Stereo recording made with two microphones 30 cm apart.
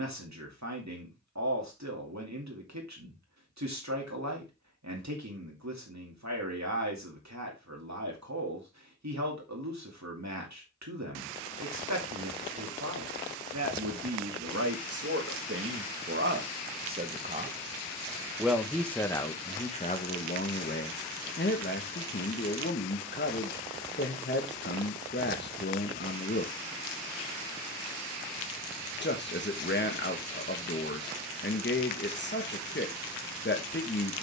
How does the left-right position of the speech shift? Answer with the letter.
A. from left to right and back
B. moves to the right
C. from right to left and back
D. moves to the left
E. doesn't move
D.